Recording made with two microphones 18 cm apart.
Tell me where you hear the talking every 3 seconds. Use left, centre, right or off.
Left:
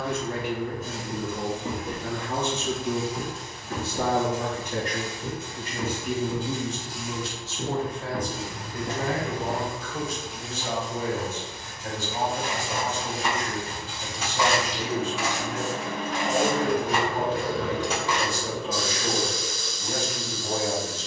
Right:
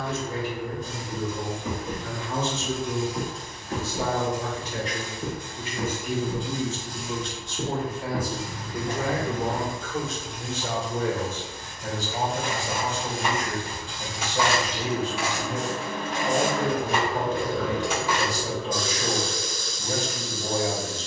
left, left, centre, right, right, right, right.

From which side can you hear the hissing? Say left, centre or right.
centre.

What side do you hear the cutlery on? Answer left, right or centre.
centre.